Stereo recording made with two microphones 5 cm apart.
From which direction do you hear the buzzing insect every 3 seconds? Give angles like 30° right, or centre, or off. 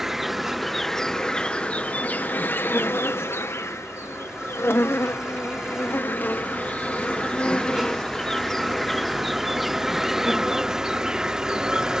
20° left, 50° left, 20° left, 10° right.